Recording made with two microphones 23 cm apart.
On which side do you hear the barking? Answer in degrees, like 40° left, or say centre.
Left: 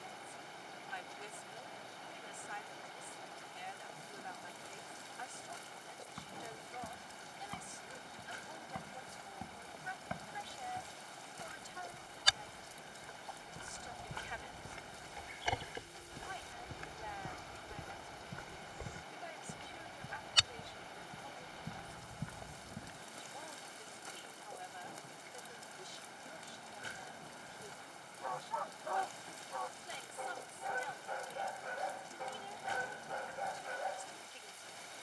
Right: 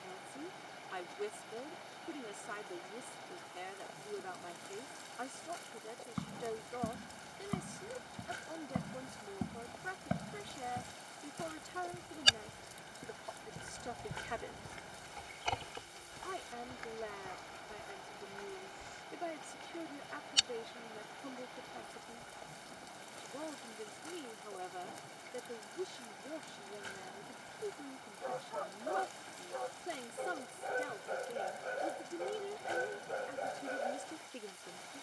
30° right.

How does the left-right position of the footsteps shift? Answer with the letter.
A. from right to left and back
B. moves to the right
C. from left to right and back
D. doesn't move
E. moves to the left
E.